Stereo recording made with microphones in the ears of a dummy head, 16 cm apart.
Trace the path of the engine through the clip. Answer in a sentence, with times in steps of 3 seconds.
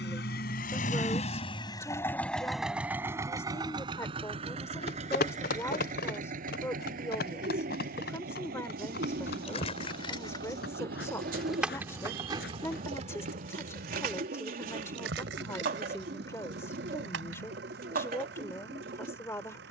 You can hear the engine on the left from 0 s and on the right from 3 s.